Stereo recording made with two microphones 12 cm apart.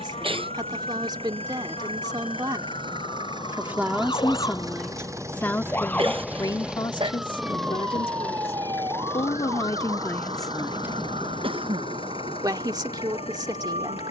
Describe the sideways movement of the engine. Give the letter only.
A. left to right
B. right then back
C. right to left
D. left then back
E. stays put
C.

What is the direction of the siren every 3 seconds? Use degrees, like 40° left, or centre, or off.
60° left, 40° left, 10° right, 50° right, 60° right.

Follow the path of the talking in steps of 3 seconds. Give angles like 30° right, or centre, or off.
40° right, centre, 40° left, 20° left, 40° right.